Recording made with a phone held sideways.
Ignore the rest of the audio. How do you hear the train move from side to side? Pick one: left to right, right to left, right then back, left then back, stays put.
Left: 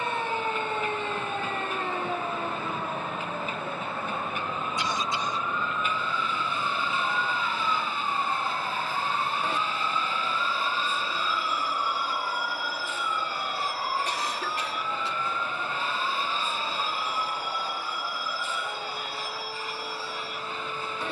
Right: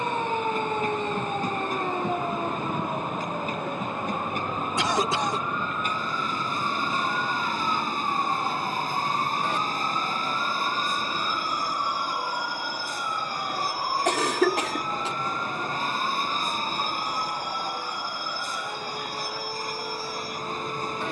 stays put.